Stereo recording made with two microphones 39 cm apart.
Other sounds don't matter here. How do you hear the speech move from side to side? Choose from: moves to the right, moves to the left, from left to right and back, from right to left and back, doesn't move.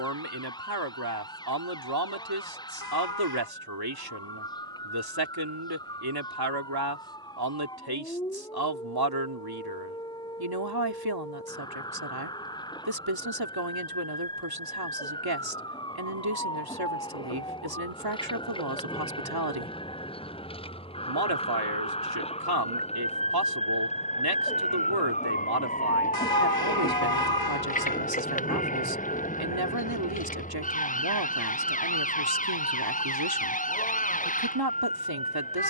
doesn't move.